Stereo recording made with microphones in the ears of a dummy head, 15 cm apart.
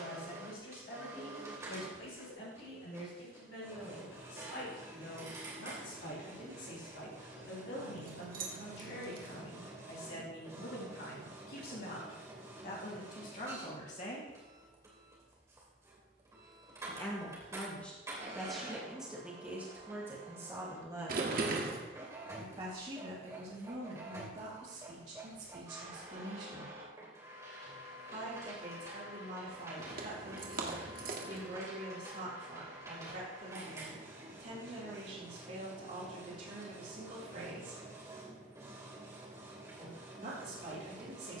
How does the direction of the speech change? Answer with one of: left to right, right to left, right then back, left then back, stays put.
left to right.